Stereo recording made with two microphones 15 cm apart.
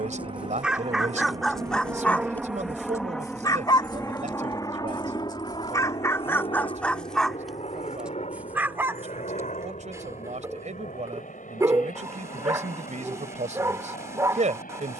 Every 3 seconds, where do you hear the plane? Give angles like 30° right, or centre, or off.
20° right, 20° left, 40° left, 50° left, 60° left.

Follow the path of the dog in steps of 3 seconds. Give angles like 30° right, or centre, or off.
centre, 30° left, centre, 20° right, 20° right.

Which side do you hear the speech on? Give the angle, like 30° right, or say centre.
60° right.